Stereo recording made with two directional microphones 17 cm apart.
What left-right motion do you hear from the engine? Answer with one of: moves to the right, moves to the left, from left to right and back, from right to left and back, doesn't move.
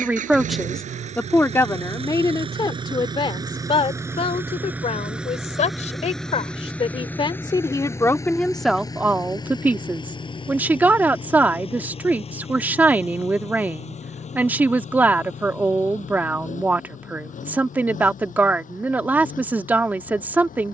moves to the left.